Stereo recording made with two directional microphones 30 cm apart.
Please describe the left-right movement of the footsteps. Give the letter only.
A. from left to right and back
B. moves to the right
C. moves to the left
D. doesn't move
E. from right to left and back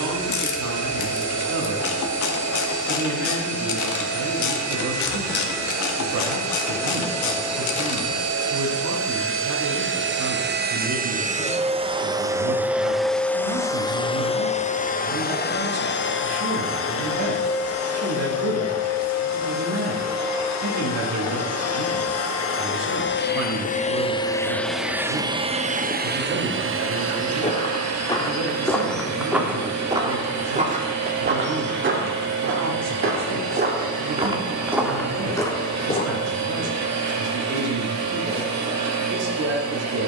A.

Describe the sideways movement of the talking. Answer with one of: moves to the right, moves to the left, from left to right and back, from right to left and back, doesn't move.
doesn't move.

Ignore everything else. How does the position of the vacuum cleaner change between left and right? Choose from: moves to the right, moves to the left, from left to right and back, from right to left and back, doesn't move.
from right to left and back.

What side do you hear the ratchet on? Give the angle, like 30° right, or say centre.
70° left.